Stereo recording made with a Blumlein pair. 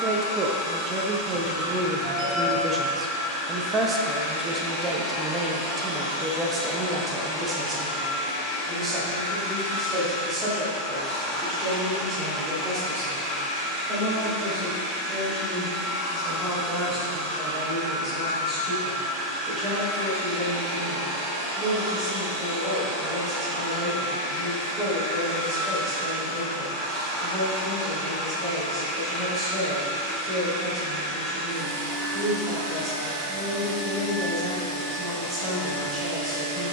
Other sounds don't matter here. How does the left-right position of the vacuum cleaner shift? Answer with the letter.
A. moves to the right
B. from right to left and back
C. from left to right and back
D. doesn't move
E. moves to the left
A.